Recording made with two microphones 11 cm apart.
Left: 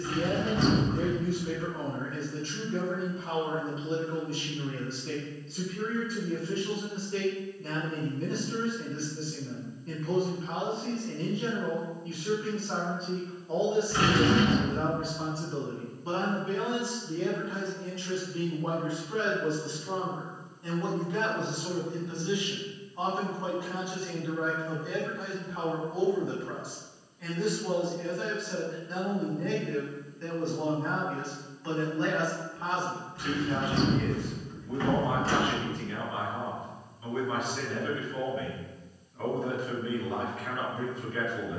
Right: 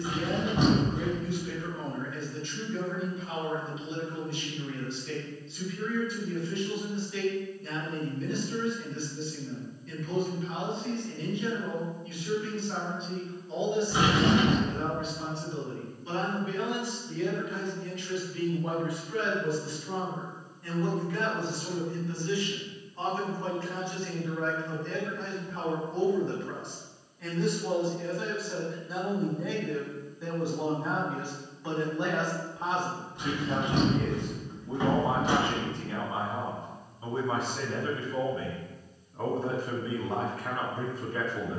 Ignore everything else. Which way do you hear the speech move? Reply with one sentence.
In this clip you hear the speech move from left to right.